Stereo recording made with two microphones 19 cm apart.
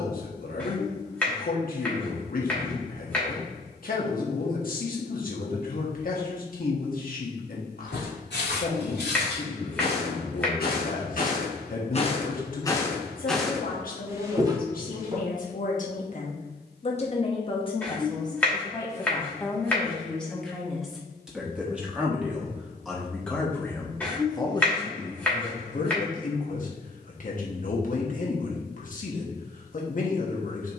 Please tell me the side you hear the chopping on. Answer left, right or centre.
centre.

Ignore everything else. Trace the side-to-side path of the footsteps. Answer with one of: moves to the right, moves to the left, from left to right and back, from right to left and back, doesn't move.
moves to the right.